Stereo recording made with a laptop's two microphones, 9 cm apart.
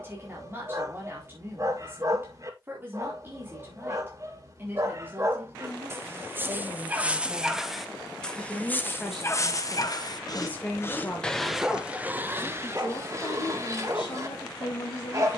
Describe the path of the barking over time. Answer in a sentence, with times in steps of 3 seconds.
You can hear the barking on the right from 0 s, in the centre from 6 s, on the left from 9 s and on the right from 12 s.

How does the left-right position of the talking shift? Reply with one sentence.
You can hear the talking go from the right side to the left.